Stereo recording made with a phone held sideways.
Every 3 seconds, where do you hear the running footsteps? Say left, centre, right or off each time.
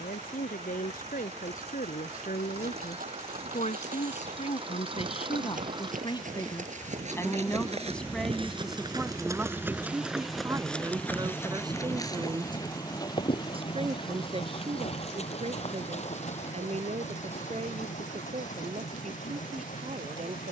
right, right, right, centre, left, left, off.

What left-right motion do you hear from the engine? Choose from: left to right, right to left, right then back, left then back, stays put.
right to left.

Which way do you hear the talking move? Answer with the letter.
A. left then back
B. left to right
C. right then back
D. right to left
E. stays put
B.